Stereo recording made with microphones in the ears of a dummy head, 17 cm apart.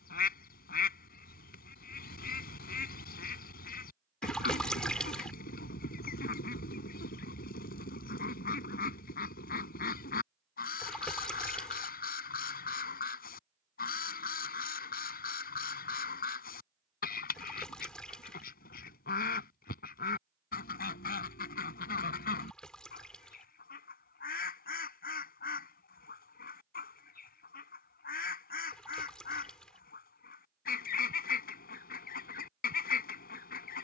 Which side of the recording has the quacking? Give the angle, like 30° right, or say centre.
50° left.